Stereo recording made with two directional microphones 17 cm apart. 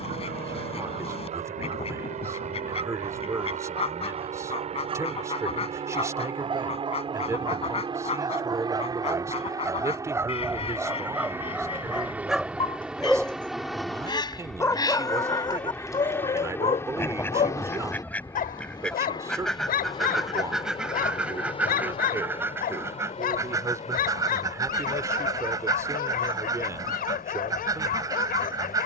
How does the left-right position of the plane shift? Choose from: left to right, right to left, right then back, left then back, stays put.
right to left.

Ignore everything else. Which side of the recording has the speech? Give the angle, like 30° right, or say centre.
20° right.